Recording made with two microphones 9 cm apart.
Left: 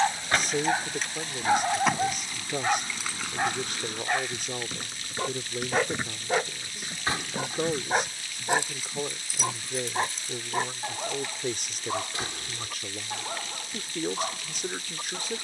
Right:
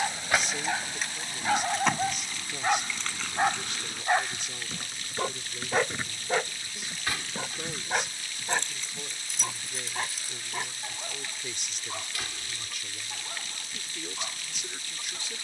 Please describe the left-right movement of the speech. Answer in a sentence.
You can hear the speech stay in one place.